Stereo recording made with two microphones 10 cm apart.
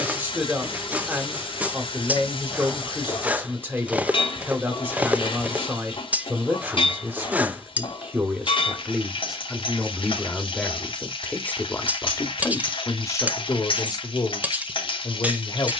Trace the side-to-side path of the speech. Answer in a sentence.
You can hear the speech move from right to left.